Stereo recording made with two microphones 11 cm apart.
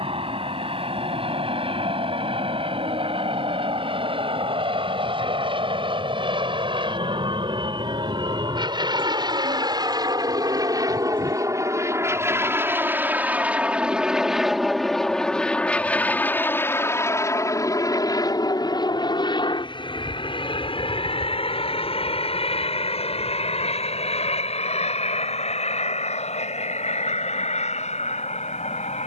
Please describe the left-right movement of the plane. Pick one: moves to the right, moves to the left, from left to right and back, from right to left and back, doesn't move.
moves to the left.